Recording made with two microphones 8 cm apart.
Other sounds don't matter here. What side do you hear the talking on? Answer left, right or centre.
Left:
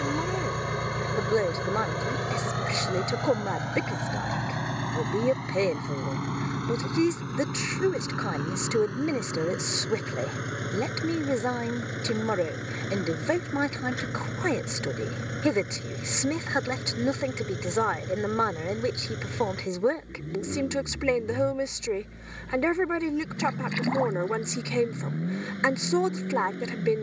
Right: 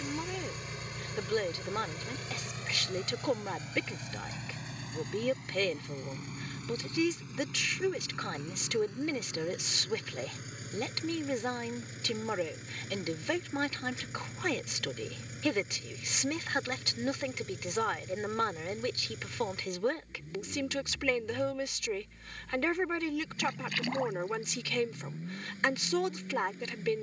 left.